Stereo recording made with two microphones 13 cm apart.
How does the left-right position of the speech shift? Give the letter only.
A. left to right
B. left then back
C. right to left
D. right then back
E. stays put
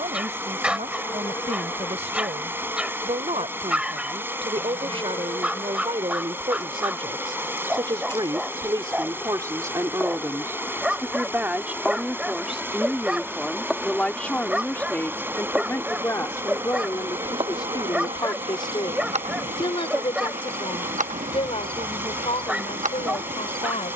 C.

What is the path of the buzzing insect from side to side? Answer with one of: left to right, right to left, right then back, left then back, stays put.
left to right.